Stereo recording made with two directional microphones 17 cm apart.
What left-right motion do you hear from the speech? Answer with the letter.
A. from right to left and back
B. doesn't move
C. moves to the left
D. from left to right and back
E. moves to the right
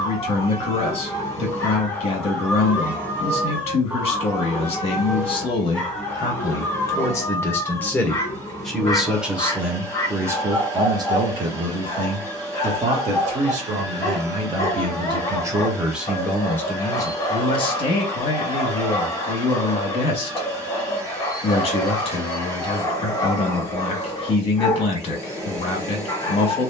D.